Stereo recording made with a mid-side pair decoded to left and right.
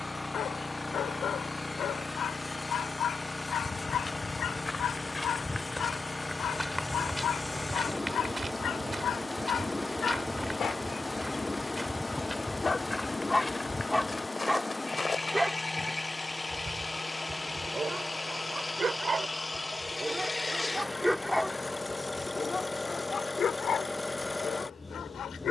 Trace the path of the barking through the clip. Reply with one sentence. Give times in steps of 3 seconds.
In this clip you hear the barking on the left from 0 s, in the centre from 12 s, on the right from 15 s and on the left from 21 s.